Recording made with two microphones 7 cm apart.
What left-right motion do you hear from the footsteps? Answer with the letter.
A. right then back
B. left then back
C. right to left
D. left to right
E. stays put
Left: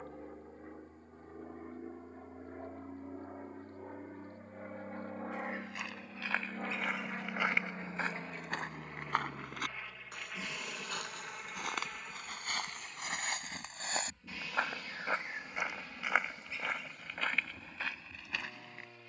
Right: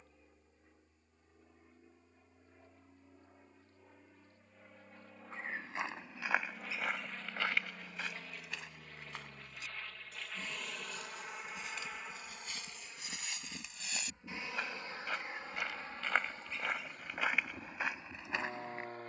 B.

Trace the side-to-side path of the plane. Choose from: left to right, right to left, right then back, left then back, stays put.
left to right.